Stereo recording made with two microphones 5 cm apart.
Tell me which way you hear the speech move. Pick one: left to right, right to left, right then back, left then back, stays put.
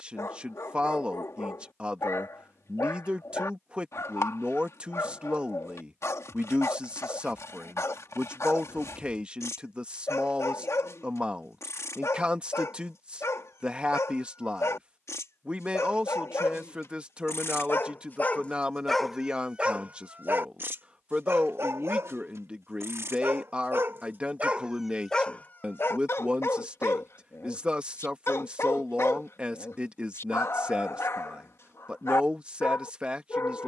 stays put.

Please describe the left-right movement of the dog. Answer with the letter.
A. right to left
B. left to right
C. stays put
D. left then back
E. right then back
E.